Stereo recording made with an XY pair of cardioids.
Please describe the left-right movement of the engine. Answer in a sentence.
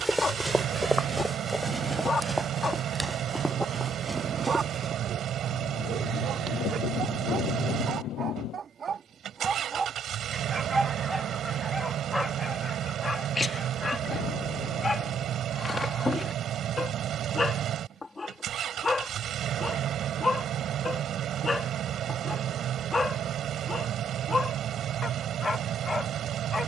In this clip you hear the engine stay put.